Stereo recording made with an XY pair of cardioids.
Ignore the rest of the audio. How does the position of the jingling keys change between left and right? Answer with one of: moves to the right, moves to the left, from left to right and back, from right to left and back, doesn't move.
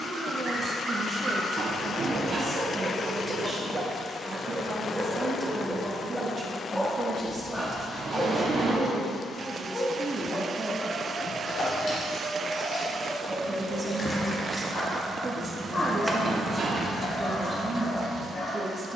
moves to the right.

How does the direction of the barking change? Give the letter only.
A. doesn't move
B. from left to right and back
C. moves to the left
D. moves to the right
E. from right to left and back
C.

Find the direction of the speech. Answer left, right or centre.
right.